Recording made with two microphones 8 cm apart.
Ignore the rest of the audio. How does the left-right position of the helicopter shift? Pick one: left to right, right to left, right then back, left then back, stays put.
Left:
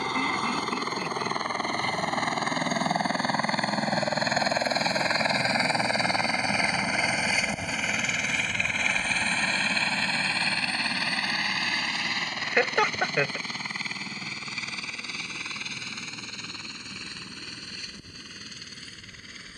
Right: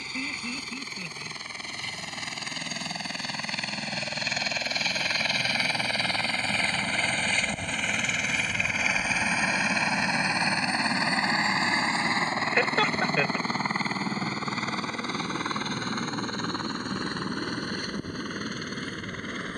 left to right.